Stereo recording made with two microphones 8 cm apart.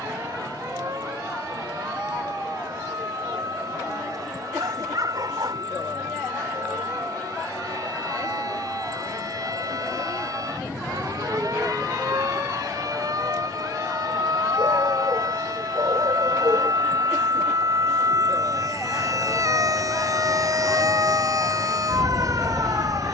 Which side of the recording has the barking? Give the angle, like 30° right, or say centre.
70° right.